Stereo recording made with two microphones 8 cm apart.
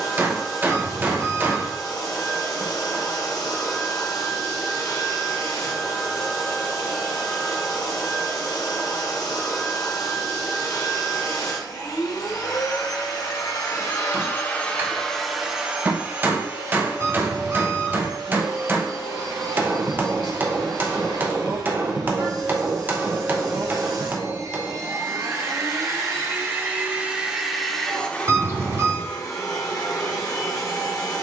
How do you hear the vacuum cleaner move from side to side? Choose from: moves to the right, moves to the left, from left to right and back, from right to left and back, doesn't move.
from left to right and back.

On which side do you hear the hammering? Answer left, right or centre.
right.